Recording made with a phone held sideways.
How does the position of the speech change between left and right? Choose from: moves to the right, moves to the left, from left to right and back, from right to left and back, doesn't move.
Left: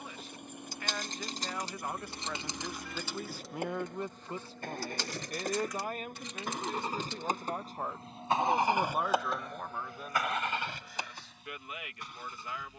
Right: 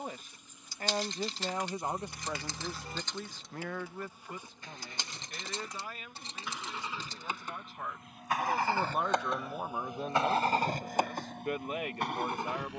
from right to left and back.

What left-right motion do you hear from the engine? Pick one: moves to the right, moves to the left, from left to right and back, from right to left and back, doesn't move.
moves to the right.